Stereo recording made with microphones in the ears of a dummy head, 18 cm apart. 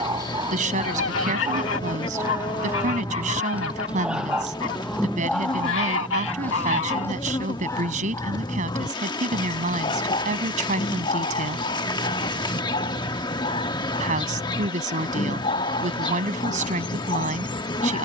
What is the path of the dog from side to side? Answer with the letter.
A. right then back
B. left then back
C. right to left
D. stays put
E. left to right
C.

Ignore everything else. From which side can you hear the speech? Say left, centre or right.
right.